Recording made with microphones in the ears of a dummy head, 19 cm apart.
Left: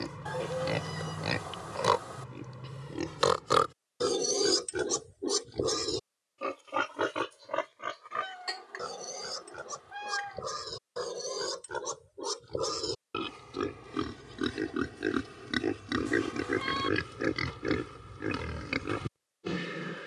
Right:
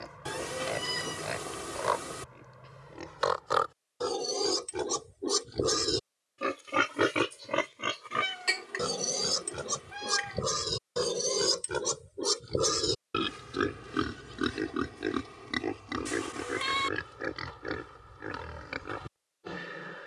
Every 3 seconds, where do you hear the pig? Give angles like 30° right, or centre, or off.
50° left, 20° left, 40° right, 50° right, 20° right, 30° left, 40° left.